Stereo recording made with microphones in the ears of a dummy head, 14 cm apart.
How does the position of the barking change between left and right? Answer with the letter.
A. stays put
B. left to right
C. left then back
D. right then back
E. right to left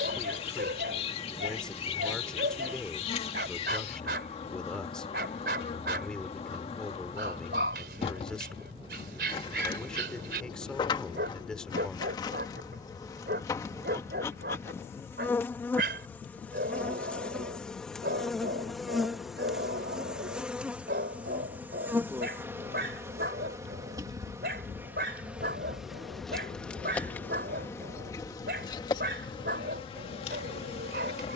A.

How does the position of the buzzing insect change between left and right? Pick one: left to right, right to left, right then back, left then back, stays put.
right then back.